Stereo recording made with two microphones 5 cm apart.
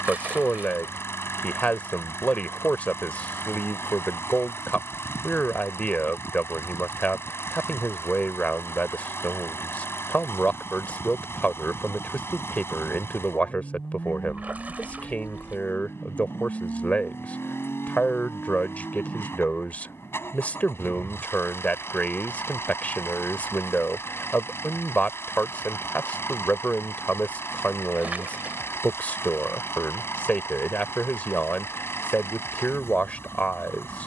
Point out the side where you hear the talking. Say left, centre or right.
left.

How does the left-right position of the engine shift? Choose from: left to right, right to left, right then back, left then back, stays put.
stays put.